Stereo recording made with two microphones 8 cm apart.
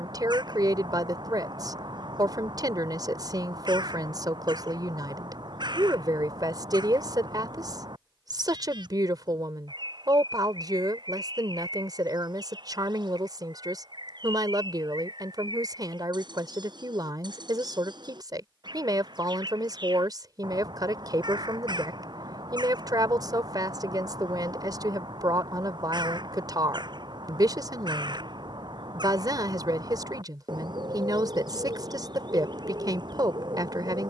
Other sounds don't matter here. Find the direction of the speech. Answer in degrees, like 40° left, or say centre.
50° right.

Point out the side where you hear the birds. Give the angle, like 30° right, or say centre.
60° right.